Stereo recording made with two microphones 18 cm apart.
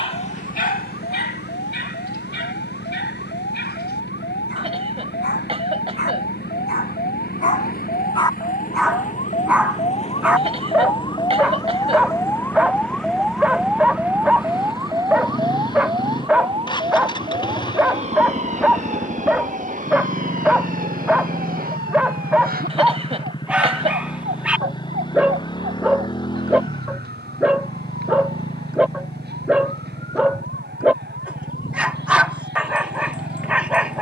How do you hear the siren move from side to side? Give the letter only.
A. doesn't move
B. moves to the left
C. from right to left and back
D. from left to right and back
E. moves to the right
E.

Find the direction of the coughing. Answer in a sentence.
In this clip you hear the coughing on the right.